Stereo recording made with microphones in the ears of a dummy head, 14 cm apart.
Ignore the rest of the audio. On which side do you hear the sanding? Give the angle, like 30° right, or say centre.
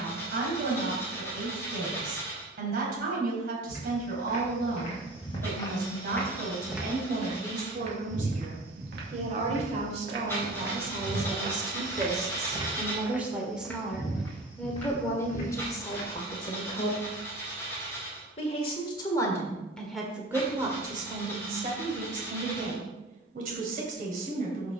10° left.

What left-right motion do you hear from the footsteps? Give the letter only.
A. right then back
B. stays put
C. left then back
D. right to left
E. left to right
A.